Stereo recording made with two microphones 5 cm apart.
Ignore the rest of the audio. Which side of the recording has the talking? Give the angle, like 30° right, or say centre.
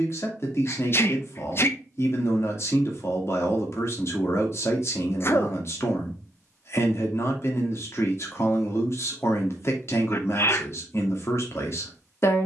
50° left.